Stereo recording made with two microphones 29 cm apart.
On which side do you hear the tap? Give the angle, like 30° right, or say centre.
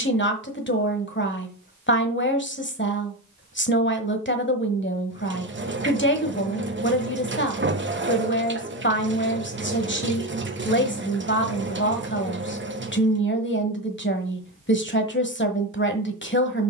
40° right.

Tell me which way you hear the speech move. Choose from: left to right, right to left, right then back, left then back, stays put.
stays put.